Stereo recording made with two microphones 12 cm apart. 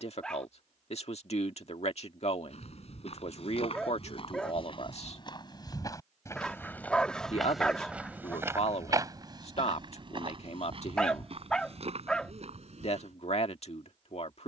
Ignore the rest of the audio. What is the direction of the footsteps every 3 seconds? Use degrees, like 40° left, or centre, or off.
60° left, 50° left, centre, 50° right, 60° right.